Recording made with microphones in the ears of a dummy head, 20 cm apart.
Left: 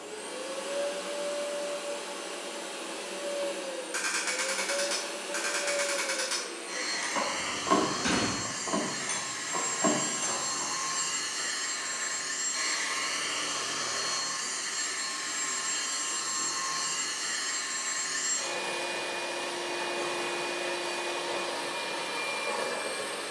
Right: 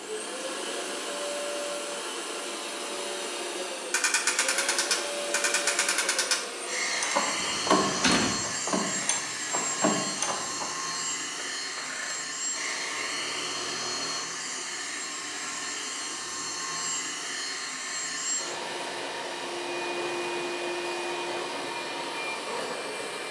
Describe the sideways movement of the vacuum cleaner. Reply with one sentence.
In this clip you hear the vacuum cleaner move from right to left.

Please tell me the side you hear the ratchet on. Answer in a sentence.
You can hear the ratchet on the right.